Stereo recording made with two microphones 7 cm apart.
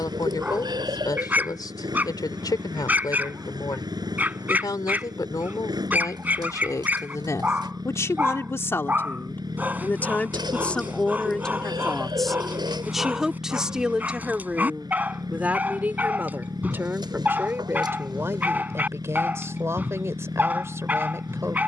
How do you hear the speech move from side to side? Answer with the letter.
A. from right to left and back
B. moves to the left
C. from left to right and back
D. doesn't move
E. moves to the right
E.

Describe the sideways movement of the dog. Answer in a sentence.
In this clip you hear the dog stay in one place.